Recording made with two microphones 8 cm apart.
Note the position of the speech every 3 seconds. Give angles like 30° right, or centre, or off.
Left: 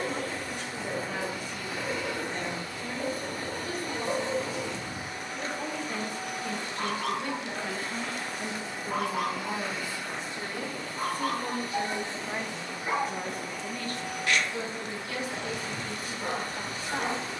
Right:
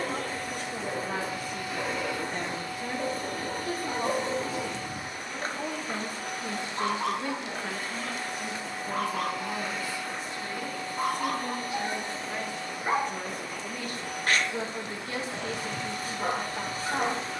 40° right, 40° right, 20° right, 20° left, 10° right, 30° right.